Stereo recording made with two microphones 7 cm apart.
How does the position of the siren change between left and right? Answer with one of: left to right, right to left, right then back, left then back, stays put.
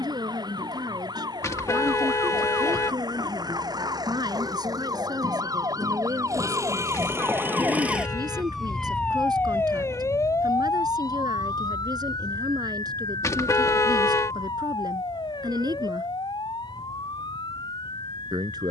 right to left.